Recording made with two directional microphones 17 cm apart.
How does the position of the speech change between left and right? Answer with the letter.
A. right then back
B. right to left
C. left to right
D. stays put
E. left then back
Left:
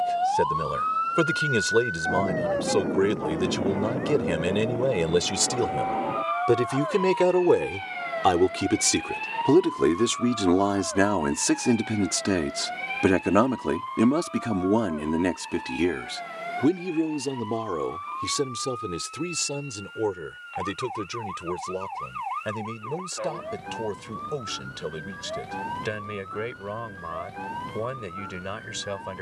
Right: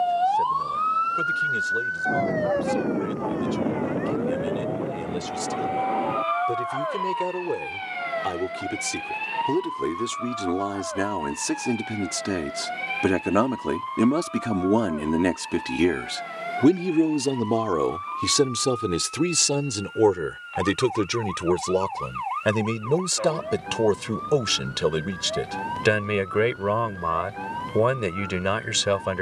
C.